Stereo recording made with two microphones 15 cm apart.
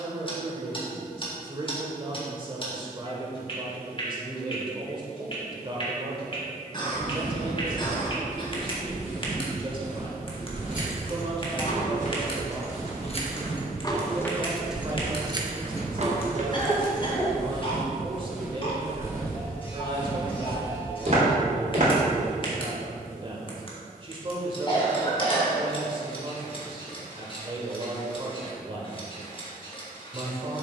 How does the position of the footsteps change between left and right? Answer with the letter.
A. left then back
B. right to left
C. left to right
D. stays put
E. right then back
A.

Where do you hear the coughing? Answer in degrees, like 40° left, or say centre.
30° left.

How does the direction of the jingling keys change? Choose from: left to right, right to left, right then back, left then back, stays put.
left to right.